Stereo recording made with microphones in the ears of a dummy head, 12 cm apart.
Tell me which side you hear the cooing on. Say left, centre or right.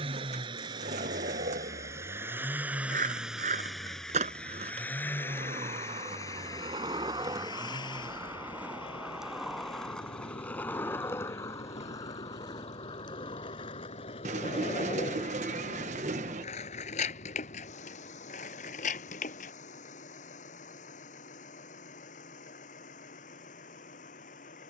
right.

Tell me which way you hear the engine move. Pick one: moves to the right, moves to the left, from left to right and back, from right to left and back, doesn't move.
moves to the left.